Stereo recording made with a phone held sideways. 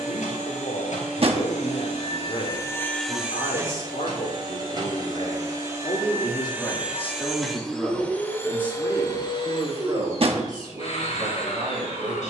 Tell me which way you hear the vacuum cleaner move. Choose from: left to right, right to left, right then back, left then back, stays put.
right then back.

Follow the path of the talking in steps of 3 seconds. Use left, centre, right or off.
left, left, centre, right.